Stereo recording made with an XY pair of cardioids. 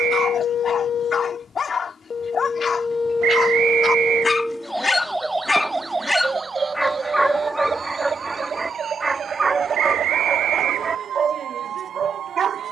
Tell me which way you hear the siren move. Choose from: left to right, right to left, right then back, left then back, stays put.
left to right.